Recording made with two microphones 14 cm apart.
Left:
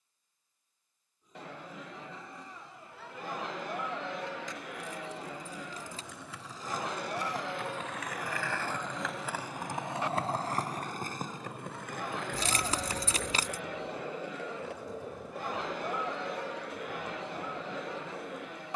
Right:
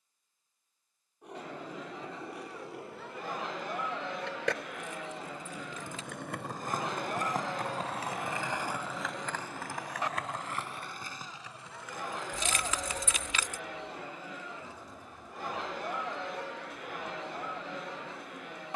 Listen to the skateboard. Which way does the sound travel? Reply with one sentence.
You can hear the skateboard travel towards the left.